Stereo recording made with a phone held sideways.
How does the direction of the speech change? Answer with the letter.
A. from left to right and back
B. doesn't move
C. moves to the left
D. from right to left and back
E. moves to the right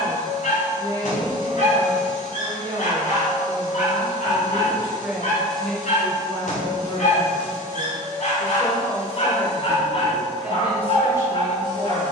D.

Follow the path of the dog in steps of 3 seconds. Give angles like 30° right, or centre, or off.
70° left, 70° left, 60° left, 40° left.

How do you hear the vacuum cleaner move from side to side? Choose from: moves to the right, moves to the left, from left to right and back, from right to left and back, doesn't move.
doesn't move.